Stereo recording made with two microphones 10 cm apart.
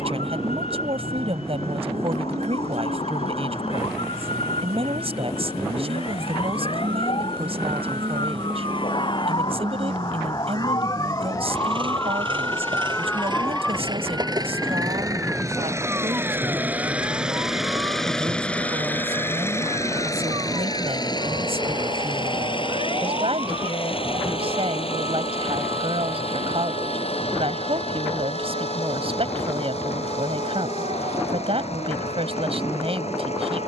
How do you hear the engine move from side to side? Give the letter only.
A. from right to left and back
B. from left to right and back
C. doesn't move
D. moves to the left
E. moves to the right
D.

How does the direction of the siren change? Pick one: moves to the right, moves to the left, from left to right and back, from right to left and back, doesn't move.
moves to the right.